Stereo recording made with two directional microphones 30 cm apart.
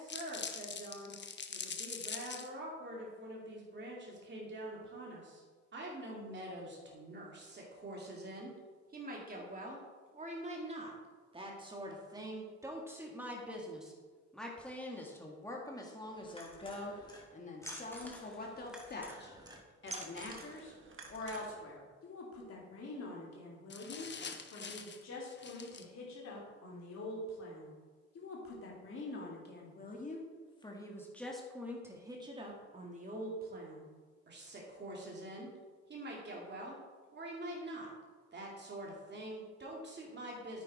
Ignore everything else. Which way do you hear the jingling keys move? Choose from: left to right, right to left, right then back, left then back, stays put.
left to right.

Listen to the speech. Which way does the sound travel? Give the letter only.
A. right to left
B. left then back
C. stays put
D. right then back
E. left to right
B.